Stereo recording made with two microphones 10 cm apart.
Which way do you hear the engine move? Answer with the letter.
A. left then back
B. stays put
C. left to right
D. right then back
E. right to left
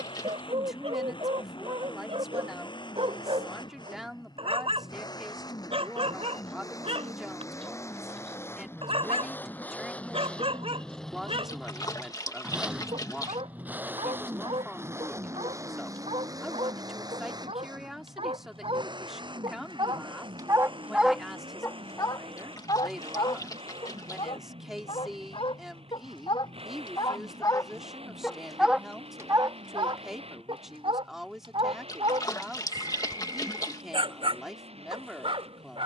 C.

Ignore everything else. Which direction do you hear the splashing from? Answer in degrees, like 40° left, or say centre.
40° left.